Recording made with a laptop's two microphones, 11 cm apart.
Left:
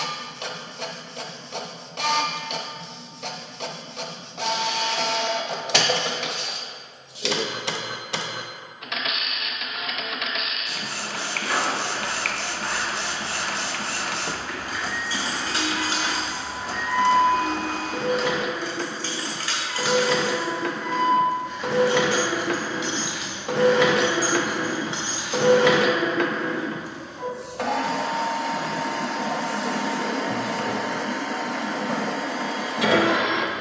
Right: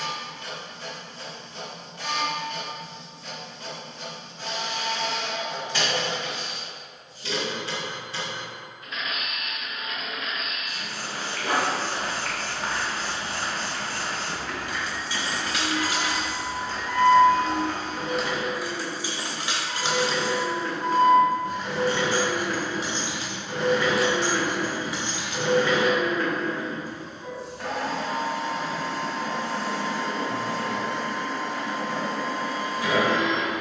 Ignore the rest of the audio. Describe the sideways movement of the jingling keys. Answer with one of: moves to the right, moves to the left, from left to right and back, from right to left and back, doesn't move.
from left to right and back.